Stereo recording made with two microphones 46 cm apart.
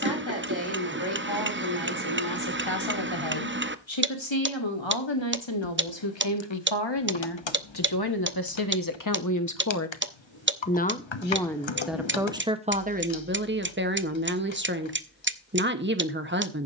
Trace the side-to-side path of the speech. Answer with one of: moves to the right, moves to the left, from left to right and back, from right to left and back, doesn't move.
moves to the right.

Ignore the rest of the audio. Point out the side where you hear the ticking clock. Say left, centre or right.
right.